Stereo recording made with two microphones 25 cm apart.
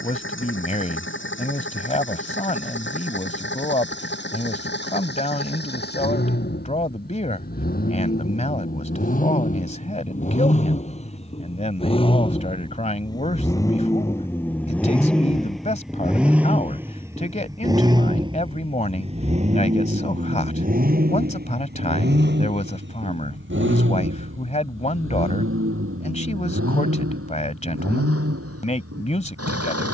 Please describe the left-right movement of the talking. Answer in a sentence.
You can hear the talking stay in one place.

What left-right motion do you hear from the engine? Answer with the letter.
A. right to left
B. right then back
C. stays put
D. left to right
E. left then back
D.